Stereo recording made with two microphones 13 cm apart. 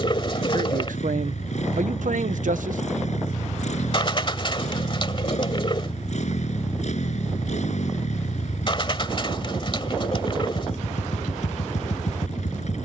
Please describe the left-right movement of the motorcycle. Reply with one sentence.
You can hear the motorcycle stay put.